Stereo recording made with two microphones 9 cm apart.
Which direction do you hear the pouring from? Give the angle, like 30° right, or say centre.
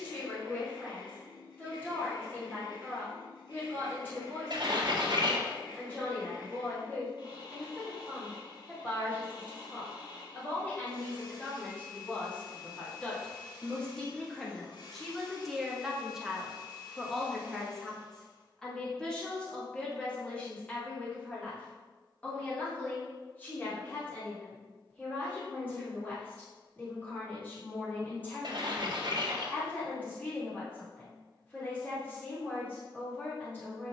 60° right.